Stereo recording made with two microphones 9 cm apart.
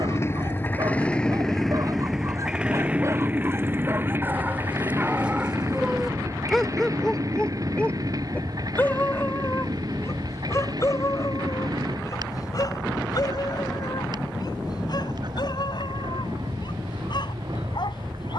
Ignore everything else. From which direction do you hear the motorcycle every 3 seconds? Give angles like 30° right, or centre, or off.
10° left, 30° right, 40° right, 50° right, 50° right, 50° right.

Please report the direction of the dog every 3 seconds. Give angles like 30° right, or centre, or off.
40° right, 20° right, 10° left, 30° left, 50° left, 60° left.